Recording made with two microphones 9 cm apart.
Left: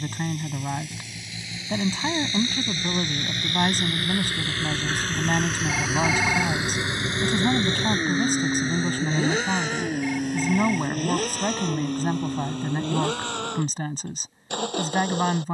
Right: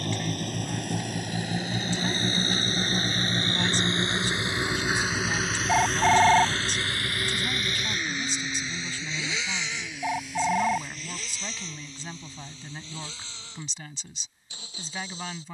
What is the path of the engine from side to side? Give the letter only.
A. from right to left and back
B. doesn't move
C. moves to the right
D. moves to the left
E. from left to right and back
D.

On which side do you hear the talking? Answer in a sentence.
In this clip you hear the talking on the left.